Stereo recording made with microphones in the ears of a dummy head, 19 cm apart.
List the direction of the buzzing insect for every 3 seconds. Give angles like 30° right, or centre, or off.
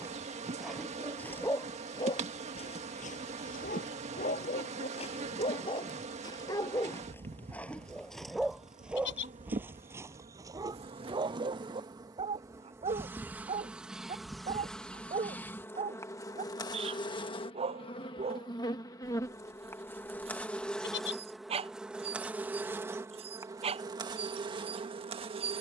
30° right, 30° right, 30° right, 30° right, 10° right, 20° left, 10° left, 10° right, 20° right.